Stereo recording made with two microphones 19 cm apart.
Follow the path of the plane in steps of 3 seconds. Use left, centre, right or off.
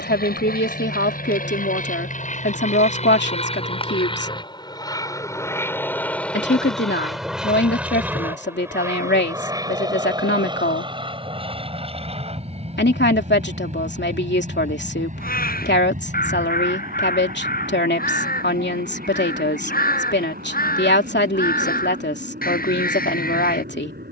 left, left, centre, right, right, right, right, right.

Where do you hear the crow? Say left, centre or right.
left.